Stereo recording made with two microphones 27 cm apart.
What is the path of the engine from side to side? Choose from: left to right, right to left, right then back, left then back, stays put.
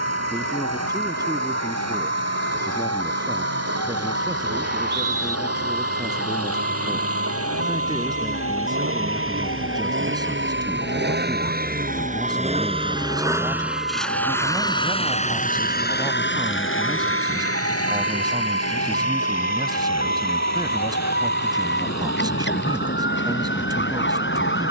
right to left.